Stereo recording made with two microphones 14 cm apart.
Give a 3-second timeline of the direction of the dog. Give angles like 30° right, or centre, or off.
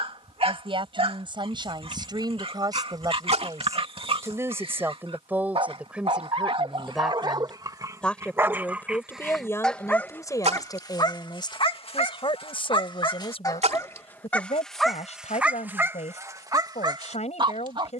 40° right, 40° right, 30° right, 20° left, 20° left, 20° right.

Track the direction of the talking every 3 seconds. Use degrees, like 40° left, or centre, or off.
30° right, 20° right, centre, 20° left, 40° left, 50° left.